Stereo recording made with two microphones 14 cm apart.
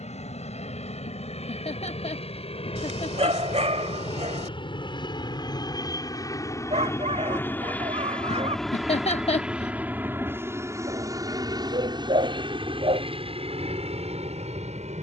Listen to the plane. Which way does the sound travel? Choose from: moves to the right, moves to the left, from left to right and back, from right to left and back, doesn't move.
moves to the right.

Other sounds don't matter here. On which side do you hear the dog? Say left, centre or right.
right.